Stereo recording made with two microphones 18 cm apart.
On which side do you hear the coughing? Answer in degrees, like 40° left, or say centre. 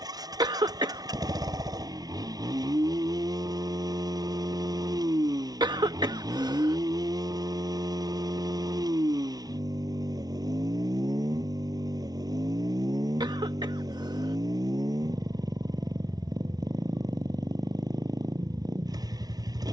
20° right.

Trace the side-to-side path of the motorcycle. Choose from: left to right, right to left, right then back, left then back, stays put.
stays put.